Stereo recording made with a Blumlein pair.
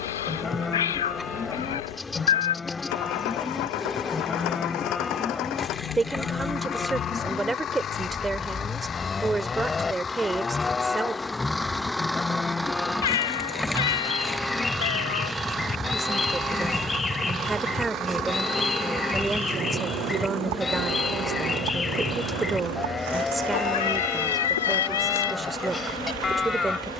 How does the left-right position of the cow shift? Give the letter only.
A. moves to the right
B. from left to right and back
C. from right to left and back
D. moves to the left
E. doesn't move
E.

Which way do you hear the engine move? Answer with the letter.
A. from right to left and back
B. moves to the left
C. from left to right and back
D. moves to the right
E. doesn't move
D.